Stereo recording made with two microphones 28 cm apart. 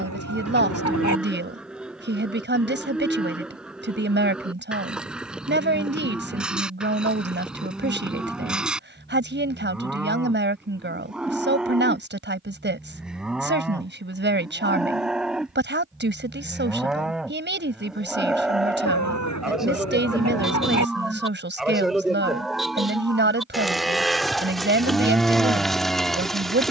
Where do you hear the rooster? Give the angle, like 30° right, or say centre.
70° left.